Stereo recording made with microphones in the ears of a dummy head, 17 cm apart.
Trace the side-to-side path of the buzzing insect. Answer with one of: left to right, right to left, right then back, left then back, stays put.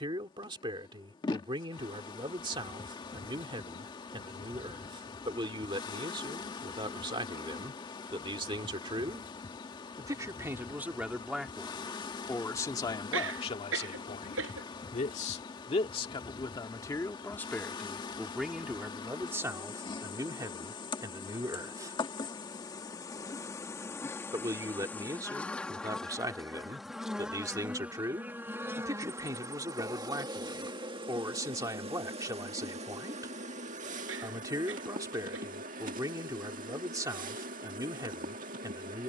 left to right.